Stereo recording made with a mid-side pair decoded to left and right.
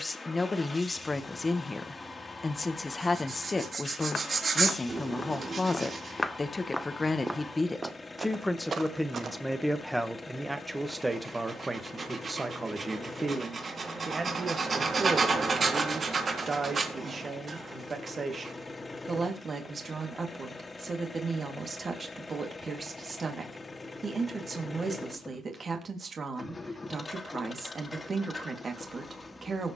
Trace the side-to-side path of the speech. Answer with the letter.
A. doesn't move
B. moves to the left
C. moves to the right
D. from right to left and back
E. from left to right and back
C.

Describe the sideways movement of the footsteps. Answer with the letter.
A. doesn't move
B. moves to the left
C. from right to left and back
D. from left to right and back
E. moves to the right
E.